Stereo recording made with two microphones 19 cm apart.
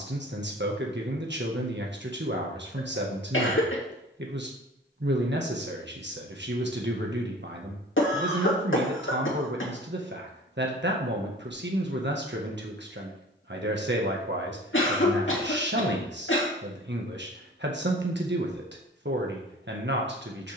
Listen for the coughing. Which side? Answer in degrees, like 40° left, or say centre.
80° left.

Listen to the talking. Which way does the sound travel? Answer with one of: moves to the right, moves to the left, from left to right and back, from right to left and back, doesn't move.
doesn't move.